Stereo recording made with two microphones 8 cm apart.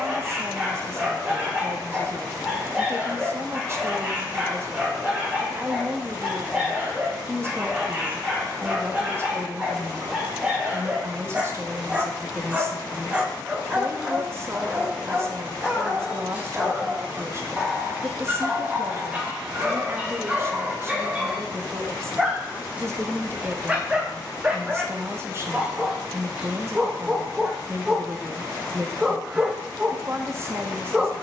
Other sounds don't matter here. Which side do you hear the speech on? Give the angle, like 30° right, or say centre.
30° right.